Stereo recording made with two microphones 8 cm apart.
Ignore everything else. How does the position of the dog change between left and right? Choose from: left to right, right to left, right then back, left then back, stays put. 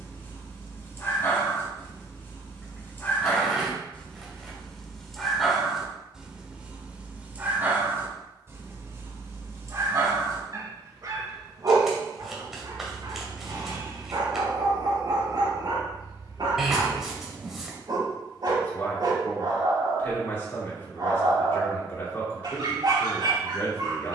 left to right.